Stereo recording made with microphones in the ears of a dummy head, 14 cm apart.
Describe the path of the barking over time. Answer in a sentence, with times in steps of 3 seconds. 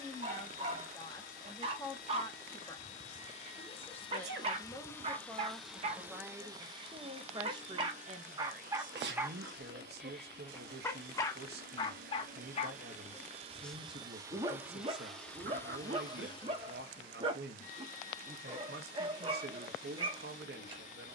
In this clip you hear the barking on the right from 0 s, in the centre from 9 s and on the right from 15 s.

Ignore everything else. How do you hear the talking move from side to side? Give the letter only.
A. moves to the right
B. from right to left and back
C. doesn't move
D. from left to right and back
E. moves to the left
A.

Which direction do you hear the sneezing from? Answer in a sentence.
In this clip you hear the sneezing on the right.